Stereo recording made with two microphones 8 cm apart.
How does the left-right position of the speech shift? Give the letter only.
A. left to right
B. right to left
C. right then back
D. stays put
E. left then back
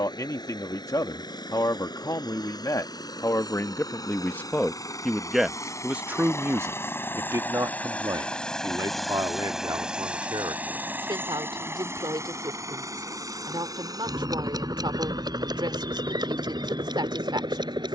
A.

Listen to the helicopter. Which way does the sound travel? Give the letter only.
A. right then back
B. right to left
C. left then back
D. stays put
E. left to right
E.